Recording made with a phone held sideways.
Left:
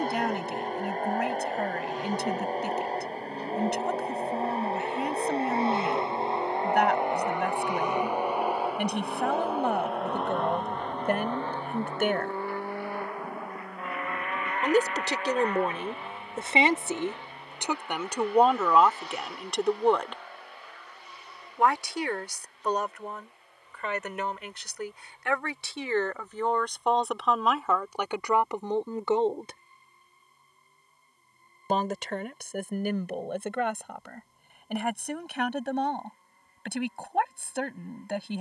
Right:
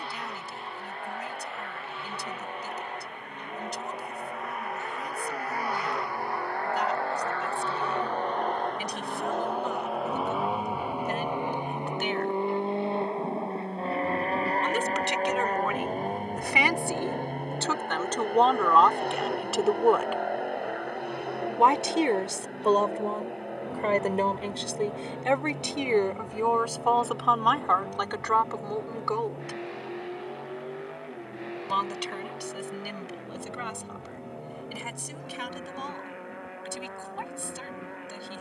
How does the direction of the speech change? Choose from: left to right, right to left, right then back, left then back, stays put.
right then back.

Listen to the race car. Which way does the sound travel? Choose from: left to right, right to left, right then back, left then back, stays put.
left to right.